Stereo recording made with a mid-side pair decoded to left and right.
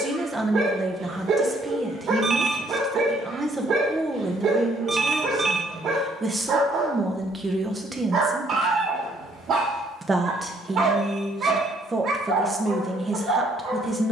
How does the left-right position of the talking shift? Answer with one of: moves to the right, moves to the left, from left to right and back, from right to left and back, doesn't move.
doesn't move.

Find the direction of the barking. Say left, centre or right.
right.